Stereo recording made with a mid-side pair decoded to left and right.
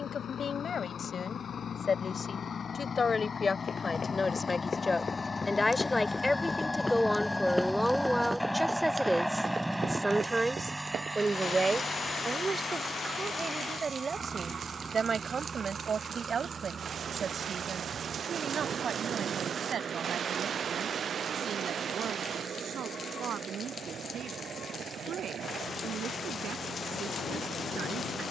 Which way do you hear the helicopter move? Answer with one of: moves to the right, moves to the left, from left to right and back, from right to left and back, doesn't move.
moves to the right.